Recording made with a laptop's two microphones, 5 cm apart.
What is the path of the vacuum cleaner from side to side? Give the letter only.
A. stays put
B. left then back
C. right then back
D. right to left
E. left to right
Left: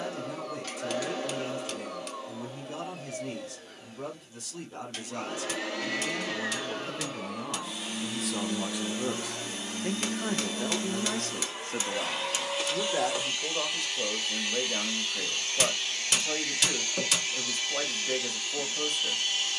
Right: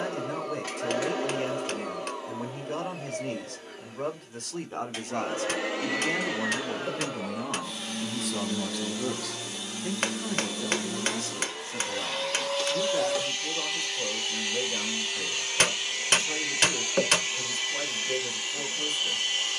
B.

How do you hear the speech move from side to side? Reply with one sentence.
In this clip you hear the speech go from the right side to the left.